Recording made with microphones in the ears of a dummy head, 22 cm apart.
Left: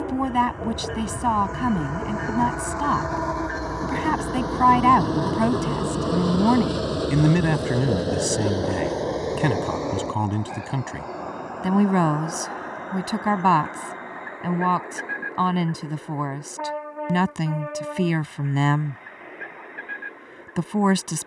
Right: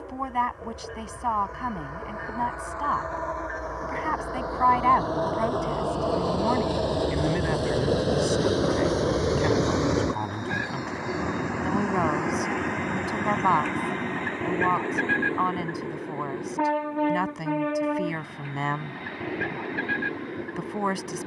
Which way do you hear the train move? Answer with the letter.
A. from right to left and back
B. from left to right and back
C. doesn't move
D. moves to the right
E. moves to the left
D.